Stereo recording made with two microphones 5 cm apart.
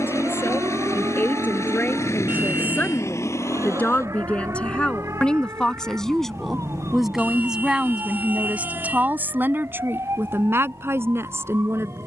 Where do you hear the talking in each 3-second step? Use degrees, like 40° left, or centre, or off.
40° left, 20° left, 20° right, 60° right.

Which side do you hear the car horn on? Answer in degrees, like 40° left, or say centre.
40° right.